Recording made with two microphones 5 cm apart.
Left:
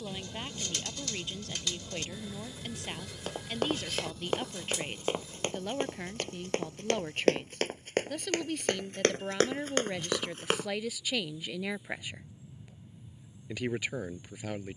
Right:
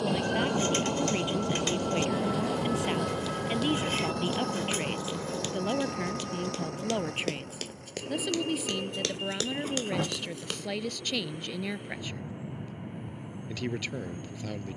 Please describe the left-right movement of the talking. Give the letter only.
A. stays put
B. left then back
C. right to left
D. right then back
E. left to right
C.